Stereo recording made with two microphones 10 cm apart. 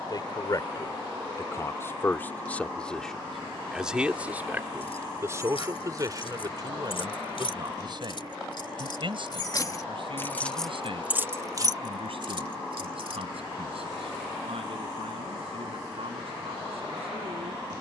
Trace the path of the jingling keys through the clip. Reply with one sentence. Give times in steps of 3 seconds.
In this clip you hear the jingling keys not at all from 0 s, on the left from 3 s, in the centre from 9 s, on the right from 12 s and not at all from 15 s.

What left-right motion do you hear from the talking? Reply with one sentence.
You can hear the talking move from left to right.